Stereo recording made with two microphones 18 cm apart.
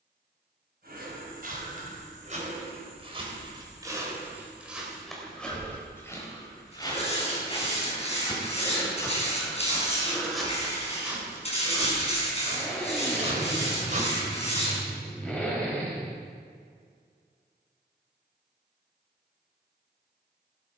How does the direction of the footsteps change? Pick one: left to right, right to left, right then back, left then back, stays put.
left then back.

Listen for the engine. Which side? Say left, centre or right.
centre.